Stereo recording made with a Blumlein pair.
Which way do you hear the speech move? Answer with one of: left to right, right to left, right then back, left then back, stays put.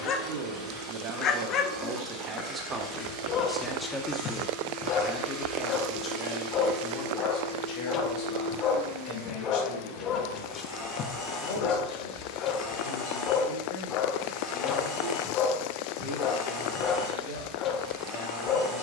right to left.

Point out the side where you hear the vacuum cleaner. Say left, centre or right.
centre.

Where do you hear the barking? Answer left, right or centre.
left.